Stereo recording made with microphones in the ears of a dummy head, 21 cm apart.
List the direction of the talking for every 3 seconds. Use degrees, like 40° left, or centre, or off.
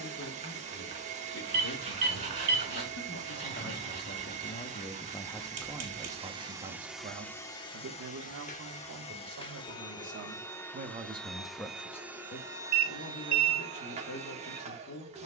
60° left, 30° left, 40° right, 40° right, 50° left.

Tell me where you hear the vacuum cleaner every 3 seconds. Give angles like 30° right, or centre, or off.
30° right, 30° right, 10° left, 10° left, 20° right.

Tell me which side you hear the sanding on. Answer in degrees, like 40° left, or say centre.
30° right.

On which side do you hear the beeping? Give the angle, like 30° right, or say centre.
30° right.